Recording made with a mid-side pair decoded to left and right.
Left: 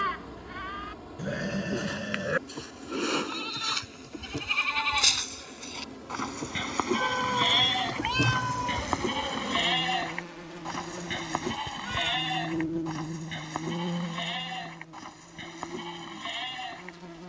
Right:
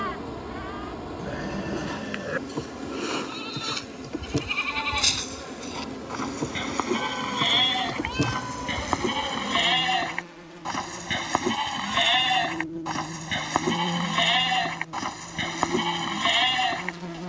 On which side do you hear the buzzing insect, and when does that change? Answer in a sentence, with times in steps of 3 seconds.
You can hear the buzzing insect on the right from 0 s, in the centre from 9 s and on the right from 15 s.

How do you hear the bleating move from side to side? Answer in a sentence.
In this clip you hear the bleating go from the left side to the right.